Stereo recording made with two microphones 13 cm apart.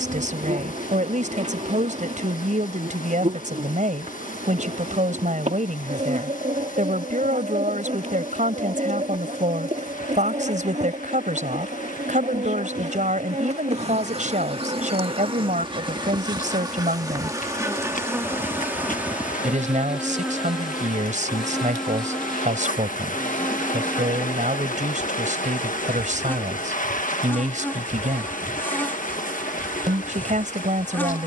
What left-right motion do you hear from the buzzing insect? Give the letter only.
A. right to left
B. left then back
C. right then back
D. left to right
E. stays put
A.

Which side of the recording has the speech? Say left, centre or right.
right.